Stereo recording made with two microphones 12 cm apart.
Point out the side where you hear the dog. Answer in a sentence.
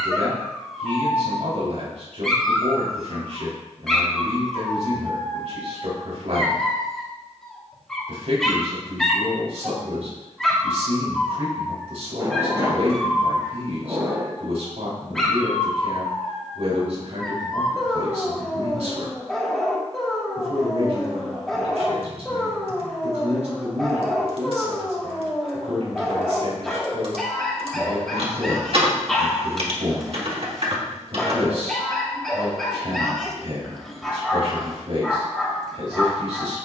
In this clip you hear the dog in the centre.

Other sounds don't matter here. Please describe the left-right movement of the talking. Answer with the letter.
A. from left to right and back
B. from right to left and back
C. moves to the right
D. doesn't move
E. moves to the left
D.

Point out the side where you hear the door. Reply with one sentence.
In this clip you hear the door on the right.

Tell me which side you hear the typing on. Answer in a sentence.
You can hear the typing on the right.